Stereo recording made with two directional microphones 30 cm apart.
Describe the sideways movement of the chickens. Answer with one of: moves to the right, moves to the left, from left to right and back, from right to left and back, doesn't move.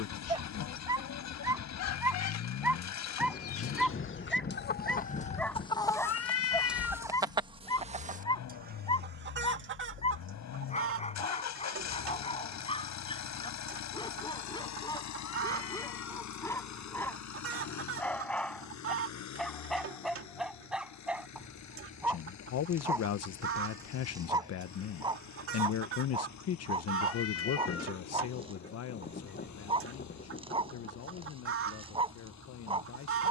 moves to the right.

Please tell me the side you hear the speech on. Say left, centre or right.
left.